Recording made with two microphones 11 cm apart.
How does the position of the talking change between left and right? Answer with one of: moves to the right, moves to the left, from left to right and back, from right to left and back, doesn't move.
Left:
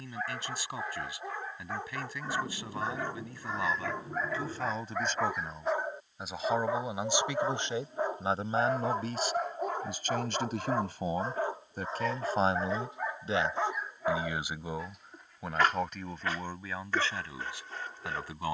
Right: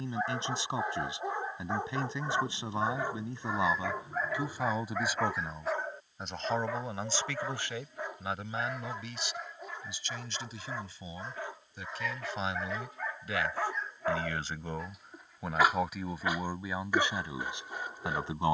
from right to left and back.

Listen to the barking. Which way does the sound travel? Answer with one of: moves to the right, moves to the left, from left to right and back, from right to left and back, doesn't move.
from right to left and back.